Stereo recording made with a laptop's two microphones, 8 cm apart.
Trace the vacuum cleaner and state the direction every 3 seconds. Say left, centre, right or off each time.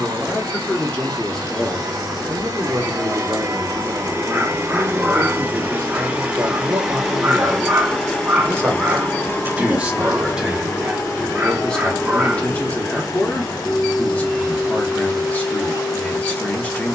right, right, centre, left, left, left.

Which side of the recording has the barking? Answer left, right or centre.
right.